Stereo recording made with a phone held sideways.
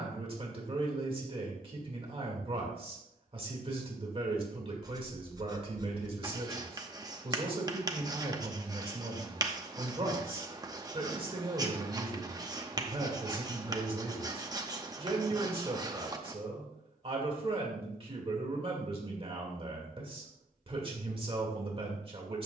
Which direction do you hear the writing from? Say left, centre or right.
right.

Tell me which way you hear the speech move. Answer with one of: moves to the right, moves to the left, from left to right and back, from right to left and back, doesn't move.
doesn't move.